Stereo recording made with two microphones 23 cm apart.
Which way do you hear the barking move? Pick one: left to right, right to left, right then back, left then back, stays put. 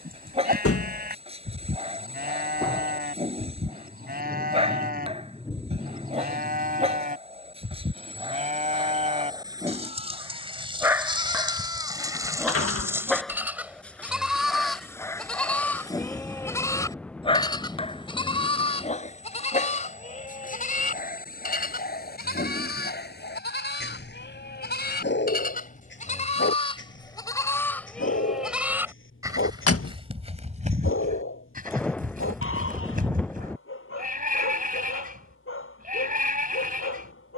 right to left.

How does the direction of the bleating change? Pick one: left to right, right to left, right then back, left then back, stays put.
left then back.